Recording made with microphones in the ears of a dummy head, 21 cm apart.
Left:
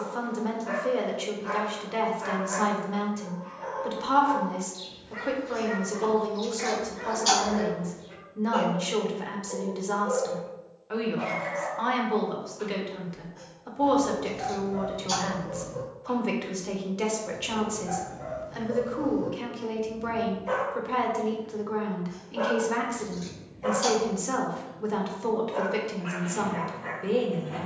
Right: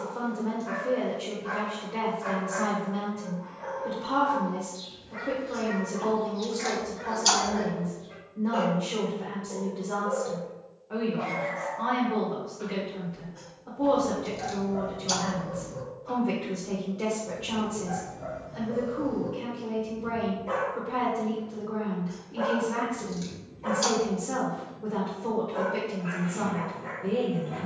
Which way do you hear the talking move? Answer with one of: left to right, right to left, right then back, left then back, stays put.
stays put.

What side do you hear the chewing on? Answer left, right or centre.
right.